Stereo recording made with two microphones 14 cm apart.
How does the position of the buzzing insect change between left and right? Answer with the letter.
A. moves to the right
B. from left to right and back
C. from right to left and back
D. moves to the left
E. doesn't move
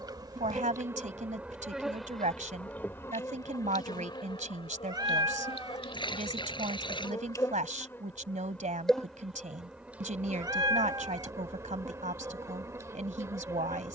C.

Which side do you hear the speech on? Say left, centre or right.
right.